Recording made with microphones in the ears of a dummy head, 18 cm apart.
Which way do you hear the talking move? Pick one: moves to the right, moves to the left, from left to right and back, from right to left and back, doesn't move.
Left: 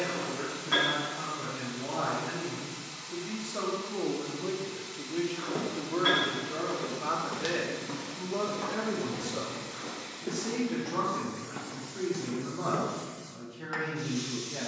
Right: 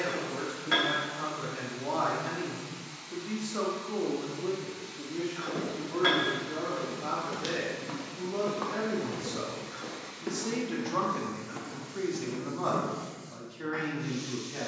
from right to left and back.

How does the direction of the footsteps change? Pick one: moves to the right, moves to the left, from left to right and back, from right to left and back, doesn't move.
from left to right and back.